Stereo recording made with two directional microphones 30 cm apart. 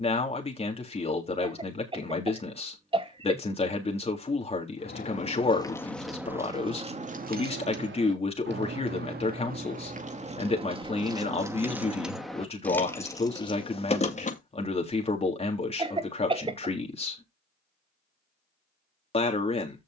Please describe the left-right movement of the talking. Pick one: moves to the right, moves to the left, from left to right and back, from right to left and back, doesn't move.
doesn't move.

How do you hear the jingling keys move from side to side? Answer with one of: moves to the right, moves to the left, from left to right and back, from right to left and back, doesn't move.
from left to right and back.